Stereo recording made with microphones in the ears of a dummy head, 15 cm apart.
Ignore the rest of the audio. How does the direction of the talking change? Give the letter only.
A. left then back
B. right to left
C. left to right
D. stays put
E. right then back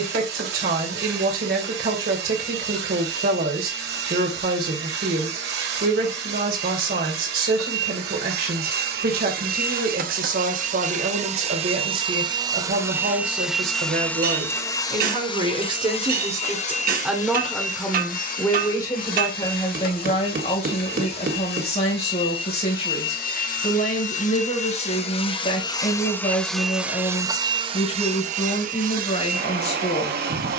B.